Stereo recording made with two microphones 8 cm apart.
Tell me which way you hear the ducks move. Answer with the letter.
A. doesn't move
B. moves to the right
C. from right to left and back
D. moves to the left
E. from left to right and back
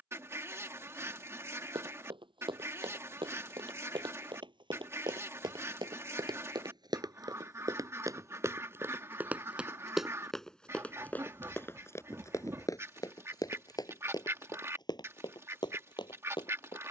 A.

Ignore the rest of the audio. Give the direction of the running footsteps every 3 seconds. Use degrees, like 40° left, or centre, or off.
80° right, 70° right, 50° right, 10° left, 50° left, 60° left.